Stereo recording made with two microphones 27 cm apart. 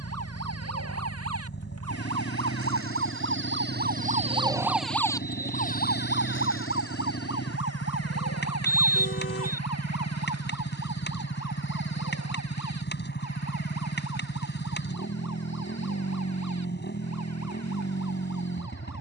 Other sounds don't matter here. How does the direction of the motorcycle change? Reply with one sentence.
You can hear the motorcycle stay put.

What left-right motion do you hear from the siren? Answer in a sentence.
In this clip you hear the siren move to the left.